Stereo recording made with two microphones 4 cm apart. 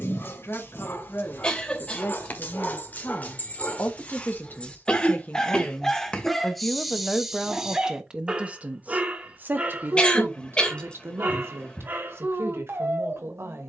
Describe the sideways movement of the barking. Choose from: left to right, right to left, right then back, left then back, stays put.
left to right.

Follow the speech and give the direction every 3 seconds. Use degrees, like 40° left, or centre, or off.
70° left, 40° left, 10° right, 50° right, 60° right.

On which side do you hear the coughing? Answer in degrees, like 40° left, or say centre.
20° left.